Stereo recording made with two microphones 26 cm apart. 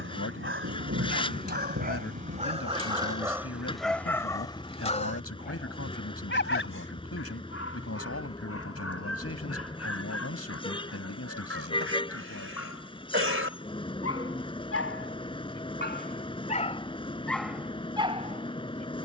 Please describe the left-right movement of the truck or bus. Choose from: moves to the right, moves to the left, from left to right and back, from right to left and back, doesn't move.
doesn't move.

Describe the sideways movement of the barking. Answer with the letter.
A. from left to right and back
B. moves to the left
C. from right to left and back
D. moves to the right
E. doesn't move
C.